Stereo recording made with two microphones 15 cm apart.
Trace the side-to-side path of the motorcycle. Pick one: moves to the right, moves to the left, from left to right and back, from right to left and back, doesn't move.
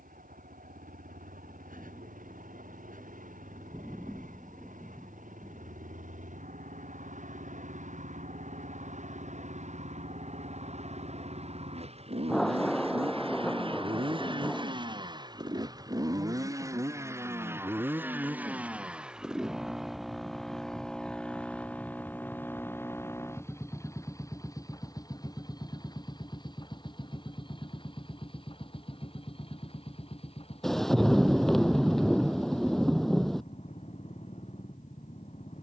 moves to the left.